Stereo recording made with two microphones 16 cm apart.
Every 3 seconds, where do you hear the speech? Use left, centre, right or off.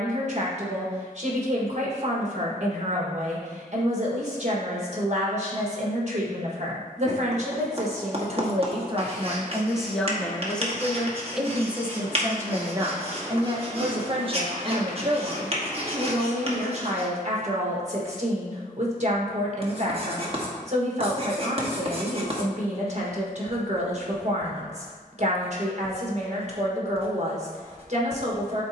right, right, right, centre, right, right, right, right, right, right.